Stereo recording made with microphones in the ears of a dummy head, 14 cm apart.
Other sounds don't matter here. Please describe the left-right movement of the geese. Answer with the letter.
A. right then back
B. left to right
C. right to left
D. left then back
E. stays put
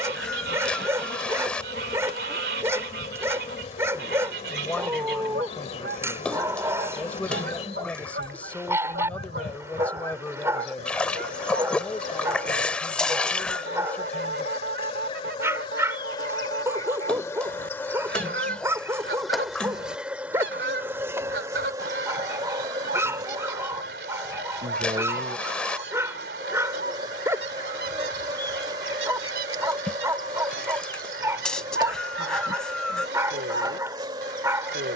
E.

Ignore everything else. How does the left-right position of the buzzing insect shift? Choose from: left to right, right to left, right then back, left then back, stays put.
left to right.